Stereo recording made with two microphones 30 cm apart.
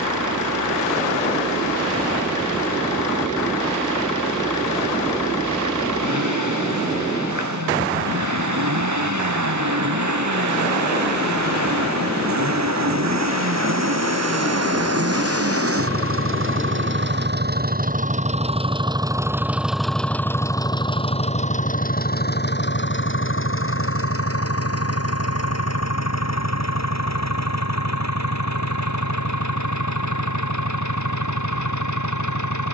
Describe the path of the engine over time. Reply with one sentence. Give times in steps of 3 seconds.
In this clip you hear the engine on the right from 0 s, in the centre from 18 s and on the left from 21 s.